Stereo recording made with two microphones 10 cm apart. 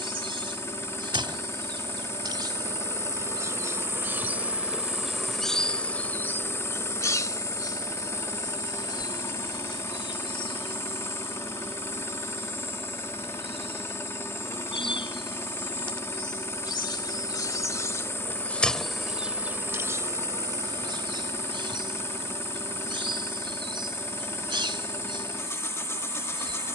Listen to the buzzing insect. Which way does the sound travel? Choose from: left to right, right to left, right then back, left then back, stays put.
left then back.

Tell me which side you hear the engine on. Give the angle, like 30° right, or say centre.
30° left.